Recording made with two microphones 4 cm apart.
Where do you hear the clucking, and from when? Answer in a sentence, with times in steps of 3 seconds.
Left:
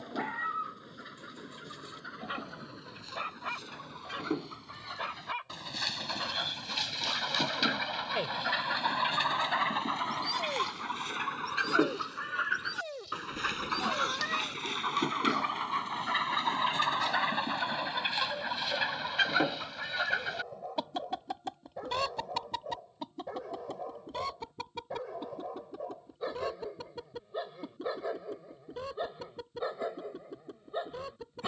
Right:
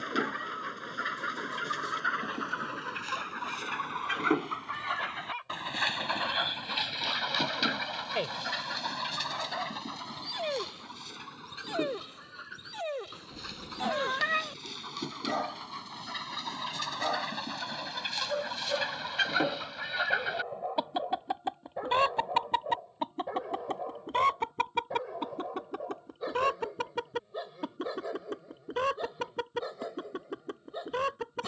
In this clip you hear the clucking on the right from 0 s, in the centre from 6 s, on the left from 9 s, in the centre from 18 s and on the right from 21 s.